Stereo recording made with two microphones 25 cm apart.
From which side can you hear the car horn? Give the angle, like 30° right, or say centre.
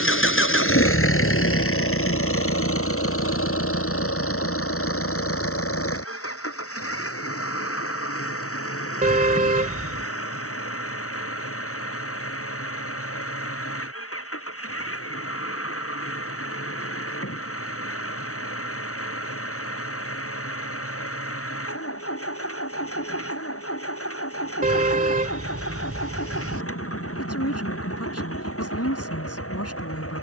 30° right.